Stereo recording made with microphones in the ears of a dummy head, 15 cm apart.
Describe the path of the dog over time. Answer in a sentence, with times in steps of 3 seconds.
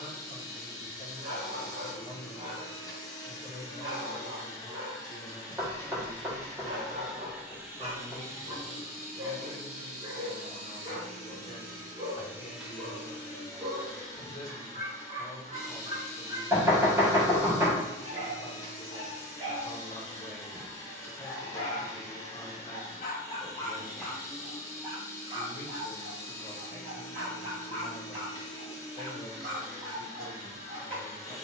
In this clip you hear the dog on the right from 0 s, on the left from 21 s and on the right from 24 s.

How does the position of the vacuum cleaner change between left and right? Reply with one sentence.
In this clip you hear the vacuum cleaner move from left to right and back again.